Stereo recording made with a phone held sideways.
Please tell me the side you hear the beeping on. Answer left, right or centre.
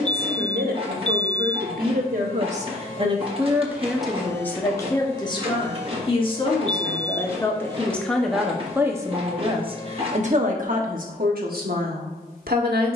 left.